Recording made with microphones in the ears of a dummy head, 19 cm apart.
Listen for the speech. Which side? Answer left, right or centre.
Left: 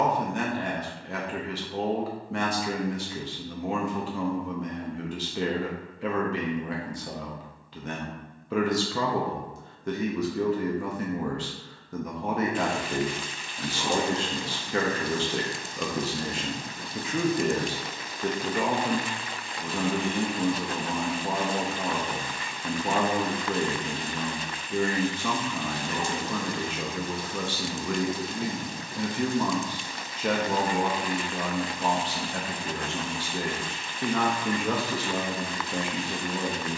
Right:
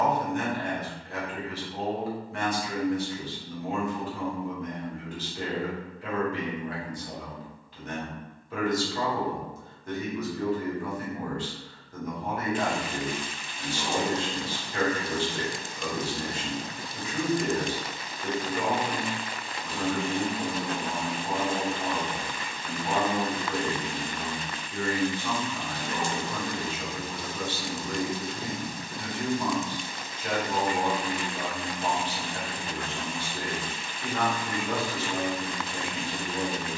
left.